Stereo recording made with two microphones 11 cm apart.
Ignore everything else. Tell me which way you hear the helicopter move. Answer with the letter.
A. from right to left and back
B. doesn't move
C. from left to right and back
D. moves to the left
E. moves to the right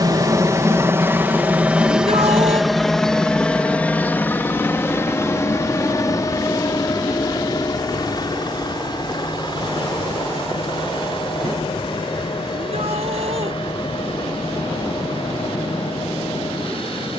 D.